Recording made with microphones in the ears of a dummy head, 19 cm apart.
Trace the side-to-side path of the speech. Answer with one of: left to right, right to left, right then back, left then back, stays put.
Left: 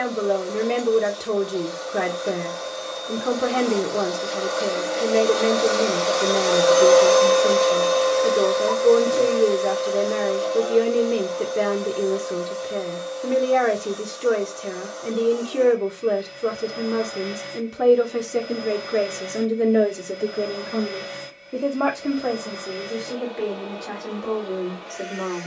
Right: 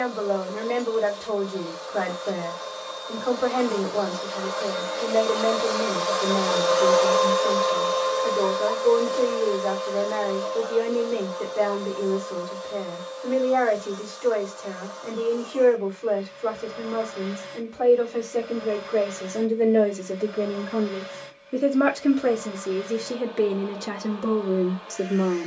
left to right.